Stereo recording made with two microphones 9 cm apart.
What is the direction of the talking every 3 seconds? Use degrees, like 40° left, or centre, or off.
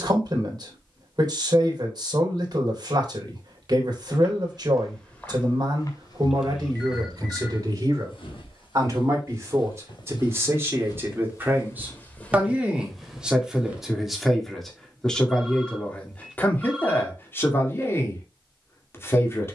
50° right, 50° right, 40° right, 30° right, 10° right, 20° left, 30° left.